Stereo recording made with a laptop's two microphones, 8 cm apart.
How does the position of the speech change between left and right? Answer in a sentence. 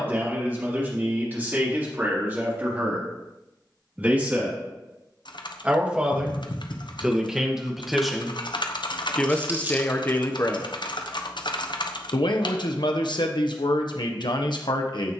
In this clip you hear the speech move to the left.